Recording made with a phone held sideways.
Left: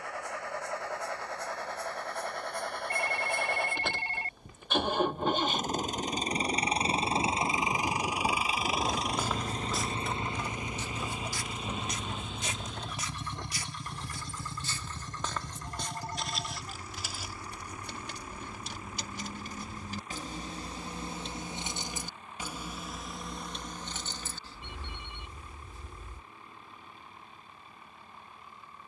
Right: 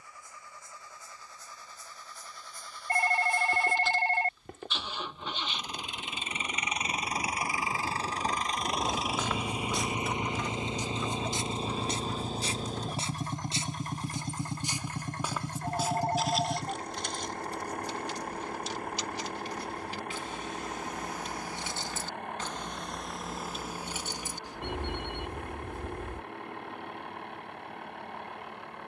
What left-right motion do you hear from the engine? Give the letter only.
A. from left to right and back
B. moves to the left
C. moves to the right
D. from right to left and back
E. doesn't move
C.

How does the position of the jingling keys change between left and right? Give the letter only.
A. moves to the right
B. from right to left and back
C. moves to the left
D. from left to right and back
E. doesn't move
B.